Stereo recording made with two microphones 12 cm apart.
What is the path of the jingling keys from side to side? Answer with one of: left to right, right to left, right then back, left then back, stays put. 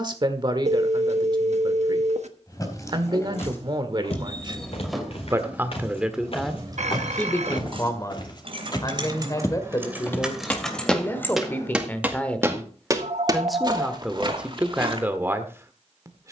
right then back.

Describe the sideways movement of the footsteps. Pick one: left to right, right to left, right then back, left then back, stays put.
left to right.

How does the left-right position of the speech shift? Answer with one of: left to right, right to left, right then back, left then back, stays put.
left then back.